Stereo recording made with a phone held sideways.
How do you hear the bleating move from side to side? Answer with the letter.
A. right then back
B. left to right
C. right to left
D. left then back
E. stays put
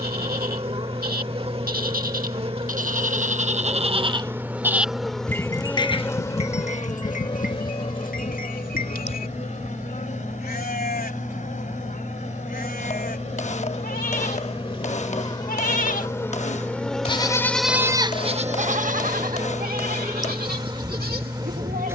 D.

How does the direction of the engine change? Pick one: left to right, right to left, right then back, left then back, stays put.
stays put.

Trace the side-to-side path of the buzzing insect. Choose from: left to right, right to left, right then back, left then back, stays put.
left then back.